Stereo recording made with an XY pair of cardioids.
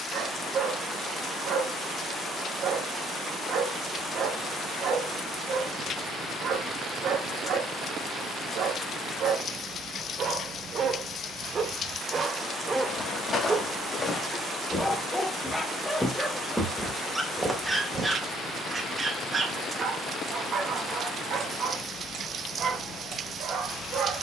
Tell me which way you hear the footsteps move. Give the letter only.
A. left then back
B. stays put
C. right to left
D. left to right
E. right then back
D.